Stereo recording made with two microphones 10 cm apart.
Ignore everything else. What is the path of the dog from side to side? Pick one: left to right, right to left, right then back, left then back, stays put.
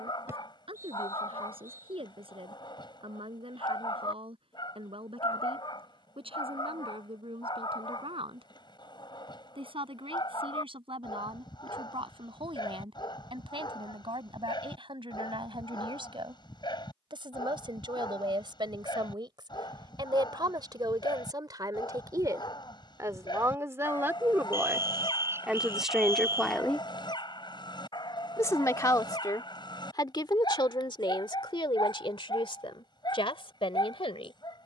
stays put.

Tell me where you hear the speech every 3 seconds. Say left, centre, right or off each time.
right, right, right, right, right, right, right, right, centre, left, left, left.